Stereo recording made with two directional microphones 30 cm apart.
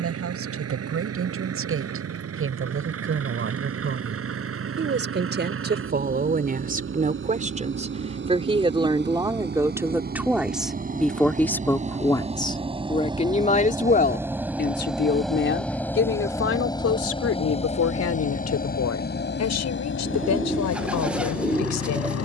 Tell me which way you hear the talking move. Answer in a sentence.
In this clip you hear the talking move to the left.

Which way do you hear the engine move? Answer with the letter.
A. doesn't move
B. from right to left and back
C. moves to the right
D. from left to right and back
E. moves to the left
E.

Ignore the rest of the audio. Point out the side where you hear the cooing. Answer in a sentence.
You can hear the cooing in the centre.